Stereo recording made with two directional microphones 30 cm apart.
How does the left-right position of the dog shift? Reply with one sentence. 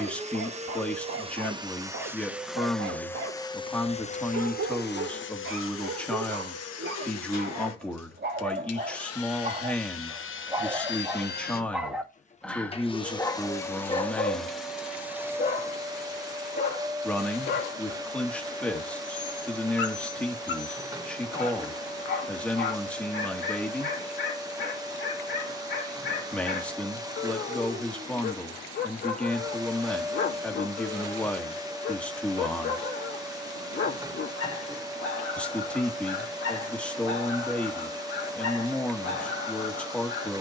You can hear the dog move to the left.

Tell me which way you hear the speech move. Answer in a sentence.
You can hear the speech stay put.